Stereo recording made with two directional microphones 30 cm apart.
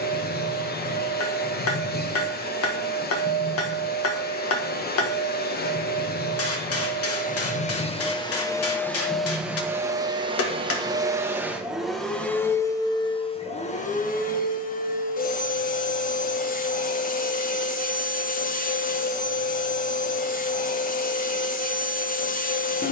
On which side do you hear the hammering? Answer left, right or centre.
left.